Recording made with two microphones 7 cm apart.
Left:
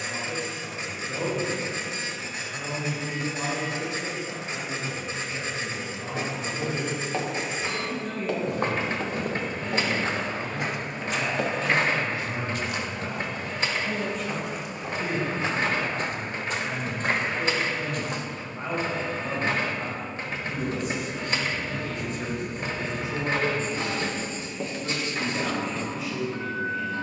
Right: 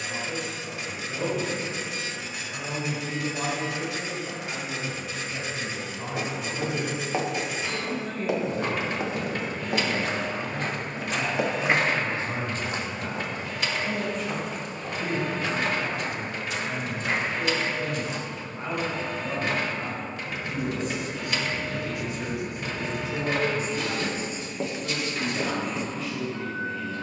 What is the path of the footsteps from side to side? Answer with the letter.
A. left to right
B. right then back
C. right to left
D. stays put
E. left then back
B.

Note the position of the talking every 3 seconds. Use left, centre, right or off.
centre, right, right, right, centre, centre, centre, centre, centre.